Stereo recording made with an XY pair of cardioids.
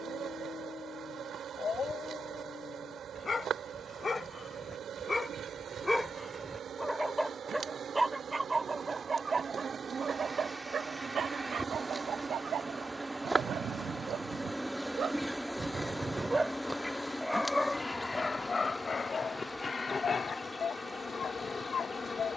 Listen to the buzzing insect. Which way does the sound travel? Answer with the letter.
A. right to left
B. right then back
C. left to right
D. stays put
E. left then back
A.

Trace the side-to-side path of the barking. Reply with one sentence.
You can hear the barking move from left to right and back again.